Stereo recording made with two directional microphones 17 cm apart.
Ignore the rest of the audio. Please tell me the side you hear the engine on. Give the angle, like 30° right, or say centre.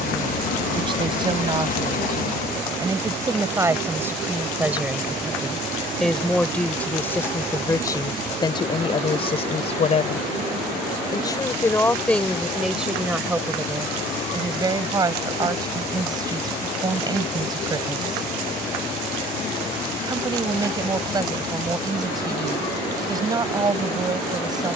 50° left.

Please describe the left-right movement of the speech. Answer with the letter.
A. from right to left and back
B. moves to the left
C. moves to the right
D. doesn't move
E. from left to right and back
A.